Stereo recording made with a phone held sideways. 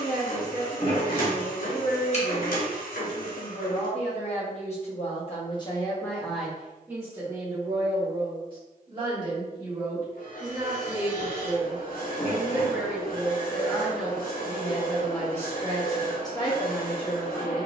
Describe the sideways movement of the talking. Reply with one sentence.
You can hear the talking move from left to right and back again.